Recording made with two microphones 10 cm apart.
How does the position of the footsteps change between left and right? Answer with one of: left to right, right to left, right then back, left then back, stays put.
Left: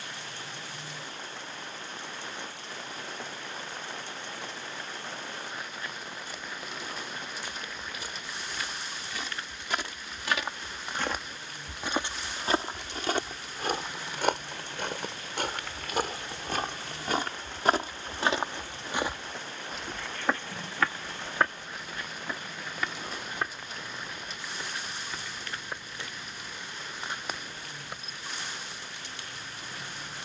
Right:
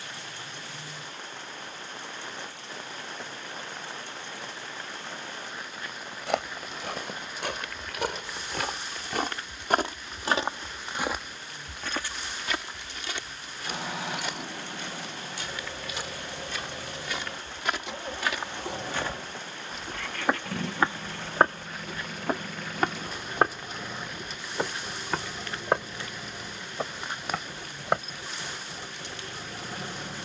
left then back.